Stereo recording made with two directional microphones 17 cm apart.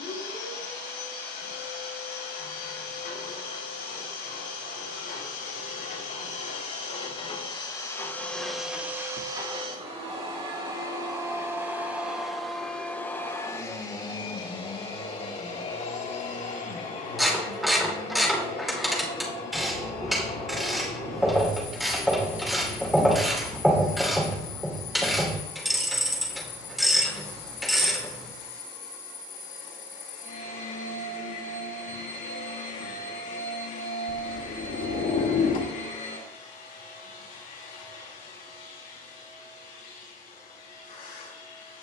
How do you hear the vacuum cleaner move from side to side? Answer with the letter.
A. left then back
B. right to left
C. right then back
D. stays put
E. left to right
C.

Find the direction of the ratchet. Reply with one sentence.
In this clip you hear the ratchet in the centre.